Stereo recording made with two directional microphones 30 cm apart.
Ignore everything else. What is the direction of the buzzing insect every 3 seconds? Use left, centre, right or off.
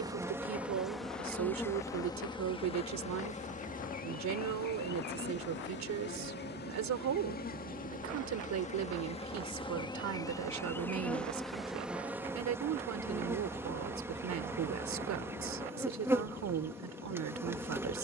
centre, left, left, centre, centre, centre.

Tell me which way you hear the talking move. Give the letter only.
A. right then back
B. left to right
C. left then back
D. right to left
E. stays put
E.